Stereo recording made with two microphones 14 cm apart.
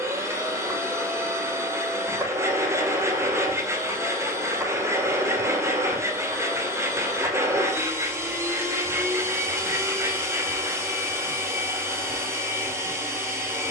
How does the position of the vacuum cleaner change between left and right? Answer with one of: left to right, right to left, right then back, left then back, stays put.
stays put.